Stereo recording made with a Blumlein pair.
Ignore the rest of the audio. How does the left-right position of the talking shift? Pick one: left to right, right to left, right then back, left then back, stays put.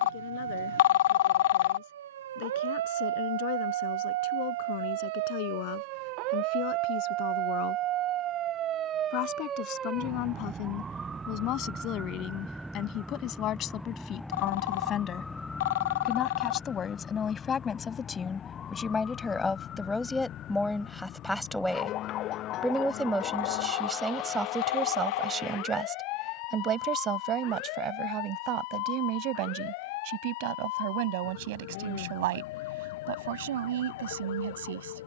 left to right.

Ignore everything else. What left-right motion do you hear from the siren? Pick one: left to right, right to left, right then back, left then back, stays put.
right to left.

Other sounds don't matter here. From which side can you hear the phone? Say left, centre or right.
left.